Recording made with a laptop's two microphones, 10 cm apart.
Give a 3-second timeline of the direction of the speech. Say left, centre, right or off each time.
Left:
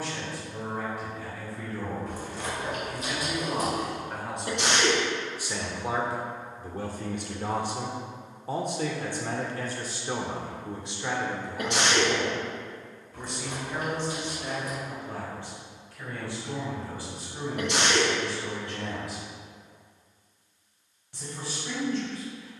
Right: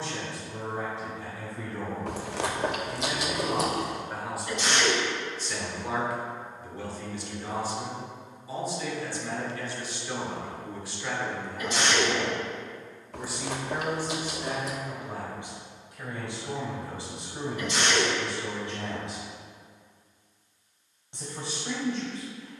right, centre, left, left, centre, right, right, right.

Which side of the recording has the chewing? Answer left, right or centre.
right.